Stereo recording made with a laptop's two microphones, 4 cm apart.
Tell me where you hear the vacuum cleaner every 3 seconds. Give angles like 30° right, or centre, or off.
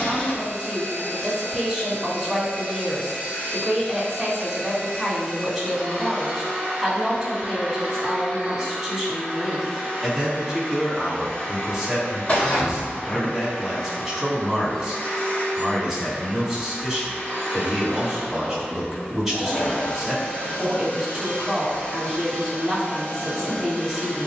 30° left, 20° left, 10° right, 10° left, 20° left, 20° left, 20° left, 20° left.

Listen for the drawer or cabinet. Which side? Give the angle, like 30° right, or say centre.
40° left.